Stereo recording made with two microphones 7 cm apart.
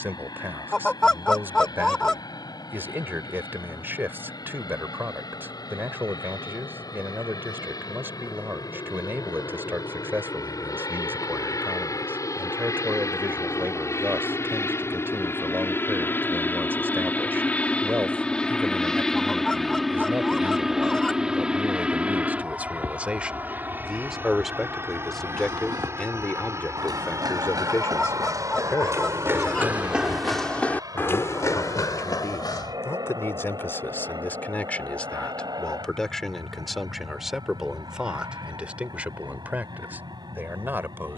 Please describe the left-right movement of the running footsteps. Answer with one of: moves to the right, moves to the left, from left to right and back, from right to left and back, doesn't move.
moves to the left.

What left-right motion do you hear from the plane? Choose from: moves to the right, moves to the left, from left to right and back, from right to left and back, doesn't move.
moves to the right.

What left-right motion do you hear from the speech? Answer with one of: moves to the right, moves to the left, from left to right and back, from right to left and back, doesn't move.
from right to left and back.